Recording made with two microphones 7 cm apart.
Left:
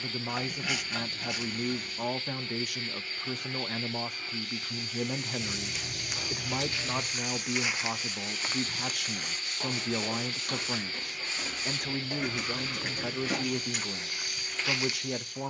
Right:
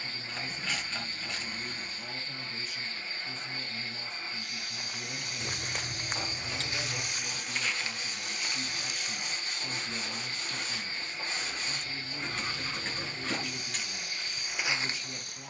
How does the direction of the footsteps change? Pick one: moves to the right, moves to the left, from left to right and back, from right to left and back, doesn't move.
from right to left and back.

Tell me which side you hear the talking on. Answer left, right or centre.
left.